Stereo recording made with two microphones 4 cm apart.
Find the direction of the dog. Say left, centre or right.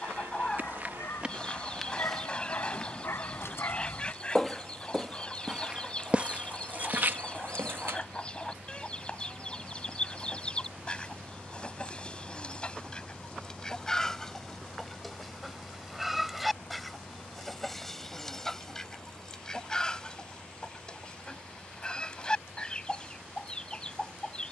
left.